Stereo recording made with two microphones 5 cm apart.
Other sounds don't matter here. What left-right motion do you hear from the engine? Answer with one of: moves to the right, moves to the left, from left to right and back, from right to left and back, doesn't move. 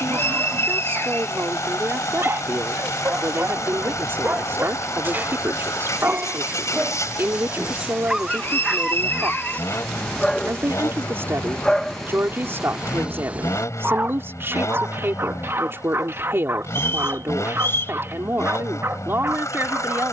doesn't move.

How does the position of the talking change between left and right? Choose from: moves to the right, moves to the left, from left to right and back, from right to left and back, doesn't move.
doesn't move.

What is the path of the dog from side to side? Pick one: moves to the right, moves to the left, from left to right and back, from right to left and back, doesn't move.
from right to left and back.